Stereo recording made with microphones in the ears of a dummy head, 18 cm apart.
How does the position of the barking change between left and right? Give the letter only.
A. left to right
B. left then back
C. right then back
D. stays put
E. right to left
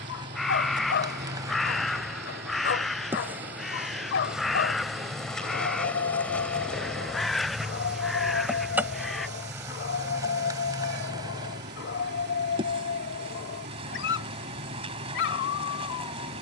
D.